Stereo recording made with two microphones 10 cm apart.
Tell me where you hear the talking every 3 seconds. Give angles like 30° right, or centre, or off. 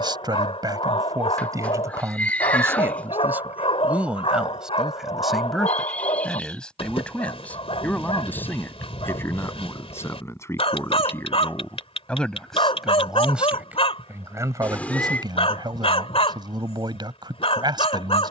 30° right, 10° right, 10° left, 20° left, 10° right, 50° right.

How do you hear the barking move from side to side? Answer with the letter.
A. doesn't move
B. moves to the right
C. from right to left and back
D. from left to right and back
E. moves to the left
A.